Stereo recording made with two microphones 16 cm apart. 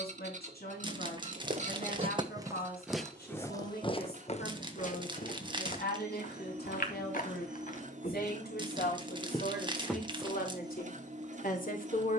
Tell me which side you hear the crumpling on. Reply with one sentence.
In this clip you hear the crumpling on the right.